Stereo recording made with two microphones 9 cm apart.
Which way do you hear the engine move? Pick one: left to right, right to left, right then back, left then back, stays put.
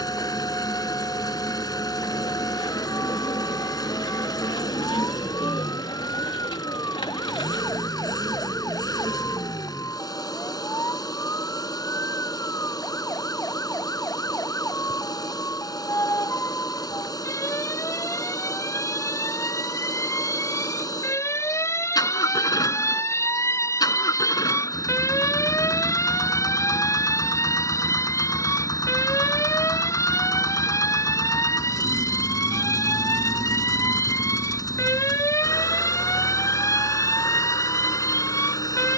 stays put.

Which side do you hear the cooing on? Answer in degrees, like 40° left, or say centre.
80° left.